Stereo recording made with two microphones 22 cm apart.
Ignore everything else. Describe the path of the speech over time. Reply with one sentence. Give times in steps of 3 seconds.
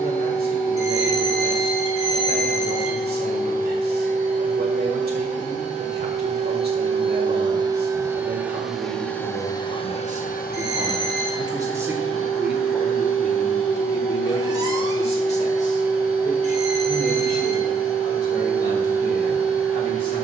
In this clip you hear the speech on the right from 0 s, in the centre from 12 s and on the left from 15 s.